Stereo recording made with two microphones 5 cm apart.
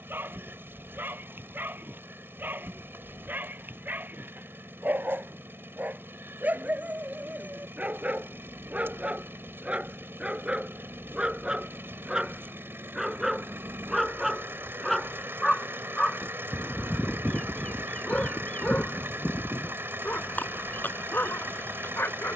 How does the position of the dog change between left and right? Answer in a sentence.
In this clip you hear the dog travel towards the left.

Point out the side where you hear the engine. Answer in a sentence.
In this clip you hear the engine on the right.